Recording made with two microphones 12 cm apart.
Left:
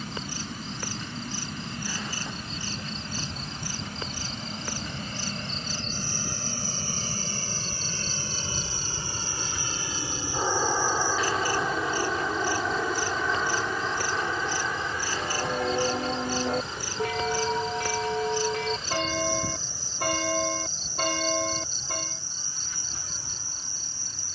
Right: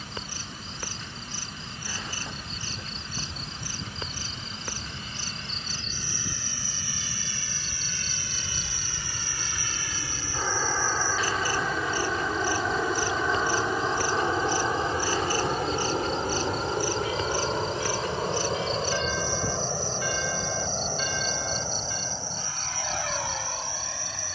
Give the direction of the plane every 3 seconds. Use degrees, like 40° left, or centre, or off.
60° left, 60° left, 40° left, 20° left, 10° right, 40° right, 60° right, 70° right.